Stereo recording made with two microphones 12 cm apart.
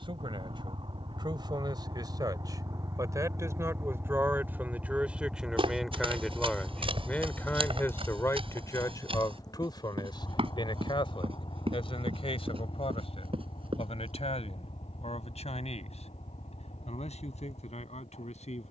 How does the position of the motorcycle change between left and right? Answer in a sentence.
In this clip you hear the motorcycle travel towards the left.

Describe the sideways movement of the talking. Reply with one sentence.
You can hear the talking move from right to left.